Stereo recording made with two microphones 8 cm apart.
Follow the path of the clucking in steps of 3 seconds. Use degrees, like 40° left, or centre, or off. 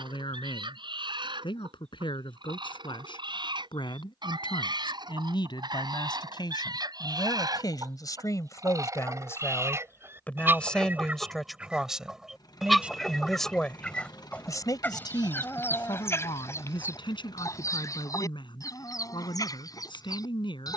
80° right, 70° right, 50° right, 30° right, 10° left, 30° left, 50° left.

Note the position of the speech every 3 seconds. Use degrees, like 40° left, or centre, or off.
80° left, 70° left, 50° left, 10° left, 10° left, 70° left, 80° left.